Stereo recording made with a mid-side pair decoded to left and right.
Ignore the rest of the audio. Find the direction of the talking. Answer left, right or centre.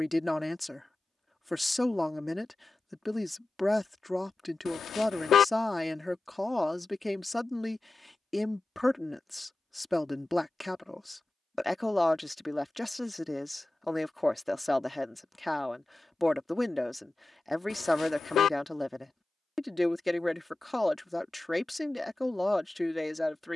centre.